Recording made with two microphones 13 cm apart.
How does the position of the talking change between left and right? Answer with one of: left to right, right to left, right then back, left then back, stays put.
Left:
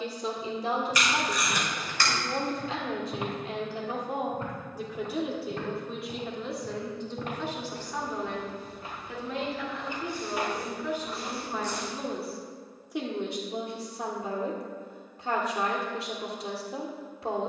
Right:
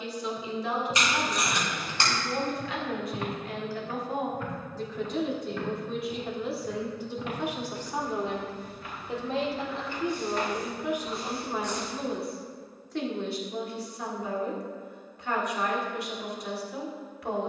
right then back.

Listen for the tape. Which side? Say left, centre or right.
right.